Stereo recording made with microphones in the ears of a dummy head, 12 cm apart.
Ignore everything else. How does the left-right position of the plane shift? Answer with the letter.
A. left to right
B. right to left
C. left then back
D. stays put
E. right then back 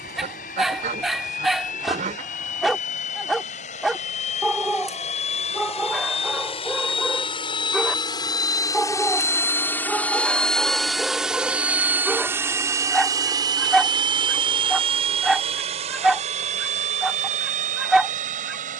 A.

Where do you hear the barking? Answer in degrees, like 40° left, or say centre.
centre.